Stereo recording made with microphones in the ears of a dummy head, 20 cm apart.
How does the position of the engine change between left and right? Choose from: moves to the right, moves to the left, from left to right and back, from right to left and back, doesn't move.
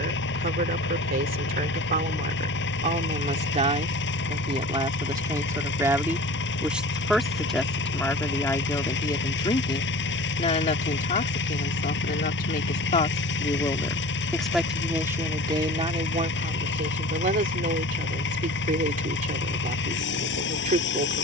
doesn't move.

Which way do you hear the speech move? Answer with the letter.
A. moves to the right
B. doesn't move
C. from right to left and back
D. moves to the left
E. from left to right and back
C.